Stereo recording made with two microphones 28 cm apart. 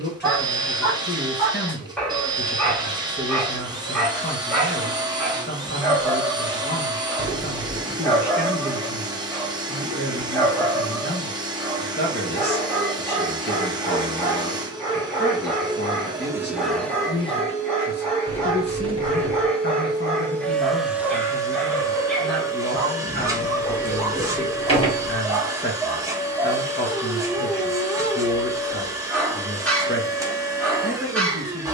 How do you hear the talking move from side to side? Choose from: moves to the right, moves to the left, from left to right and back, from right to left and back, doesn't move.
doesn't move.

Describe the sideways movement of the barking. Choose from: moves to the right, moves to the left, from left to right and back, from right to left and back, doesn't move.
doesn't move.